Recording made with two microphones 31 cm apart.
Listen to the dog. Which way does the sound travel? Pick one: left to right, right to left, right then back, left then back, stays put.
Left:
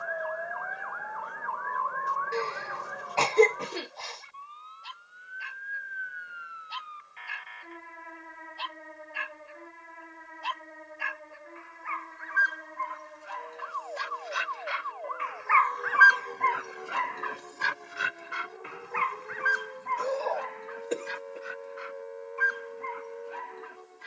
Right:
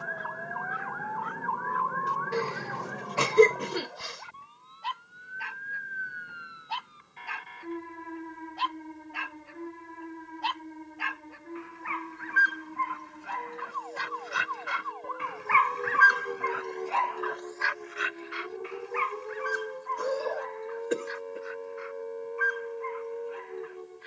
right to left.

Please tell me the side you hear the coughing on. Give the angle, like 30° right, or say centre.
20° right.